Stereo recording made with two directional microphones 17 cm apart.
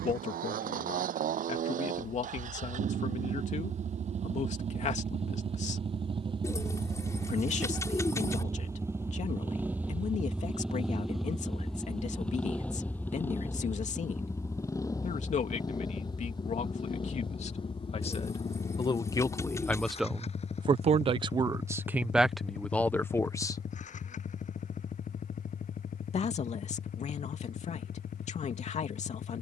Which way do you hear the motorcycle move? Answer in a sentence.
In this clip you hear the motorcycle go from the right side to the left.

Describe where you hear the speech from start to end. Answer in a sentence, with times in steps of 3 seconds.
In this clip you hear the speech on the left from 0 s, in the centre from 18 s and on the left from 24 s.